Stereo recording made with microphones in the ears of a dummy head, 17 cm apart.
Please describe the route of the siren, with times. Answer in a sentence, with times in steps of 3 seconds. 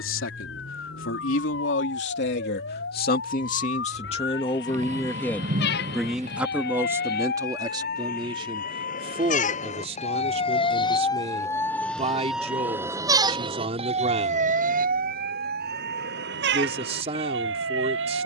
In this clip you hear the siren on the left from 0 s and on the right from 12 s.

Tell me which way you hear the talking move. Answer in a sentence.
In this clip you hear the talking move to the right.